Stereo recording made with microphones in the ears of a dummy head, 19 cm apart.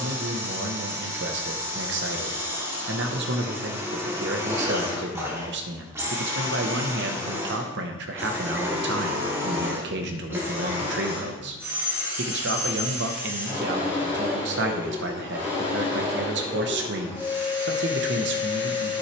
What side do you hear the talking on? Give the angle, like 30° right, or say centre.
60° right.